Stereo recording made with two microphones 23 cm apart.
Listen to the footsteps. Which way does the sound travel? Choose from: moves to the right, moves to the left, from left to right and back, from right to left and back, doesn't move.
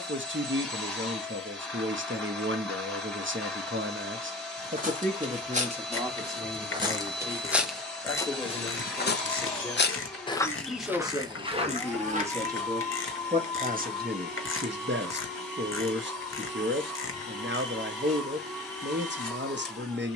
from right to left and back.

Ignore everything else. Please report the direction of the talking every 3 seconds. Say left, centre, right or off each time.
right, right, centre, centre, right, right, right.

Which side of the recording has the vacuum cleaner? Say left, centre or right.
centre.